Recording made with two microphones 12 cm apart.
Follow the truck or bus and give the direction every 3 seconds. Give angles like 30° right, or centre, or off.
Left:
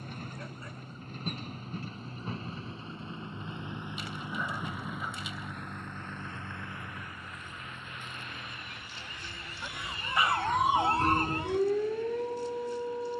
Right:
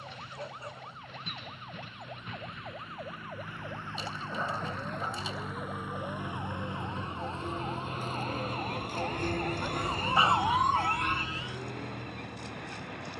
40° left, 10° left, 30° right, 60° right, 70° right.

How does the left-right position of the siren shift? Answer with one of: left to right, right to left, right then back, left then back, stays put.
right to left.